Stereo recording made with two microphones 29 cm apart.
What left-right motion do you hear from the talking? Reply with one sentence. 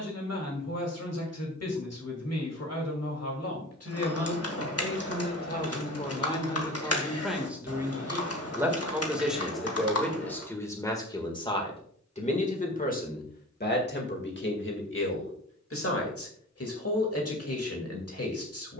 In this clip you hear the talking move from left to right and back again.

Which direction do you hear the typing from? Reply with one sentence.
You can hear the typing on the left.